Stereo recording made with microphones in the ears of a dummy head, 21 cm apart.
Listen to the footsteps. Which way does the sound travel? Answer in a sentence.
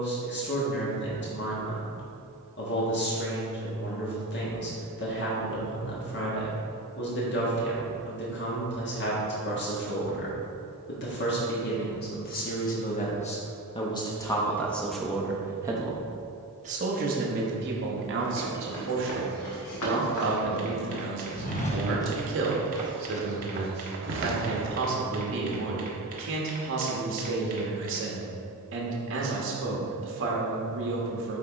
You can hear the footsteps move from left to right.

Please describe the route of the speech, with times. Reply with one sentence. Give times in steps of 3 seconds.
You can hear the speech on the left from 0 s and on the right from 15 s.